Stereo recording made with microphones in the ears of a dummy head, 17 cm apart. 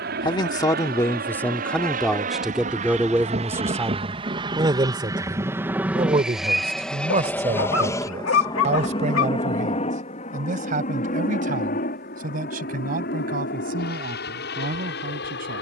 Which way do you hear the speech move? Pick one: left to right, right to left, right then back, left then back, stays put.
left to right.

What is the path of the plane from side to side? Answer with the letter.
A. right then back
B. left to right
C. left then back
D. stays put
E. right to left
E.